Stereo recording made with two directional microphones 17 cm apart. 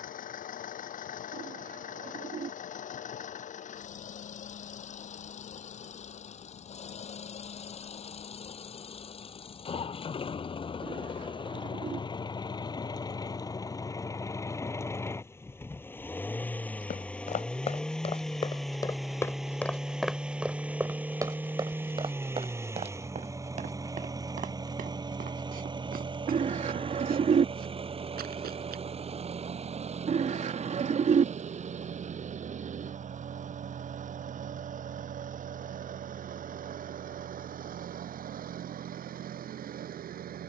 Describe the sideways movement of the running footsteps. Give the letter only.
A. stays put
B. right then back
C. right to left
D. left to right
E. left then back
D.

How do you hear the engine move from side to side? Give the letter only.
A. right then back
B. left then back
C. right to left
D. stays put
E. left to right
E.